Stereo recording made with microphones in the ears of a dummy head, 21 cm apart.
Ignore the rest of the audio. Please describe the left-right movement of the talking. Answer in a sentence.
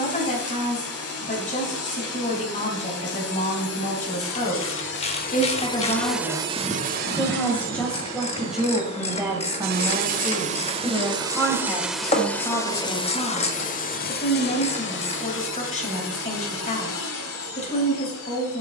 You can hear the talking move from left to right and back again.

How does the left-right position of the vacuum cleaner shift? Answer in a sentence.
You can hear the vacuum cleaner go right and come back.